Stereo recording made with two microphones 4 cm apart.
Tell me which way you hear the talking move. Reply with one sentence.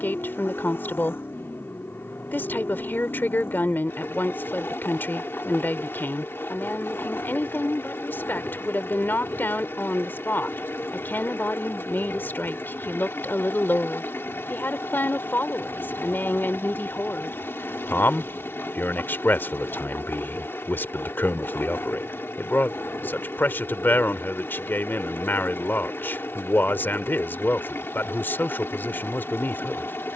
You can hear the talking stay in one place.